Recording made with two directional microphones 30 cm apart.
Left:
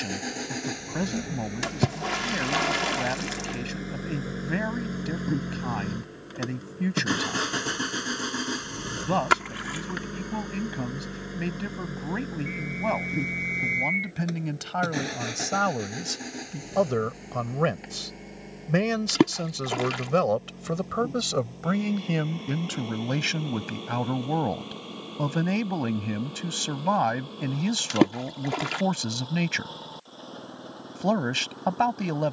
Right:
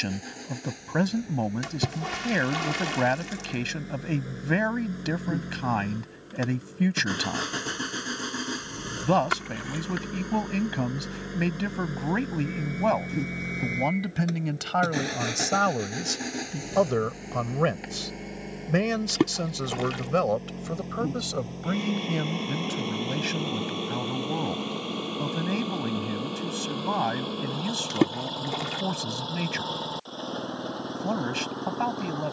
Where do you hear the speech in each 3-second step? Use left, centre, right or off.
right, right, right, right, right, right, centre, left, left, left, left.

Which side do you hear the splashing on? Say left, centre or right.
left.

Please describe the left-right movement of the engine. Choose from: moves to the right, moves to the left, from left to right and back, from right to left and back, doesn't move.
moves to the right.